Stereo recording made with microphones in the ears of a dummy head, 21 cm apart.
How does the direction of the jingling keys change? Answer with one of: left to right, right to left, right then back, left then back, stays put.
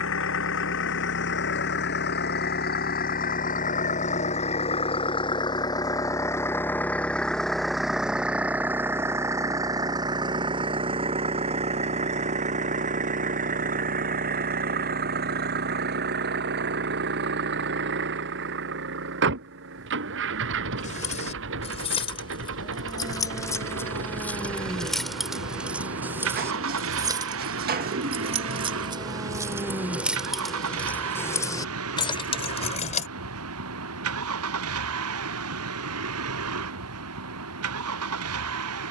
right then back.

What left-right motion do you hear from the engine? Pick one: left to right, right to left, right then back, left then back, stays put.
left to right.